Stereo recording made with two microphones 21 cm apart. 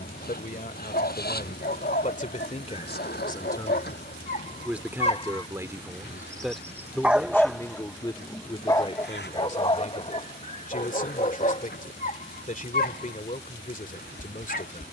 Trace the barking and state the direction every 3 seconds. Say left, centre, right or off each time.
left, left, centre, left, left.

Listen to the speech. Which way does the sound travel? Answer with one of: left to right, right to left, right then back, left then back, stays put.
right then back.